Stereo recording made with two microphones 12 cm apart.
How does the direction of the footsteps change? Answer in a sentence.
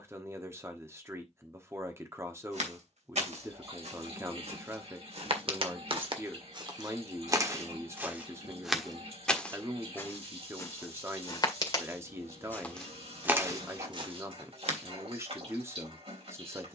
In this clip you hear the footsteps go left and come back.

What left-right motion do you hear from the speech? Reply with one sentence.
You can hear the speech stay put.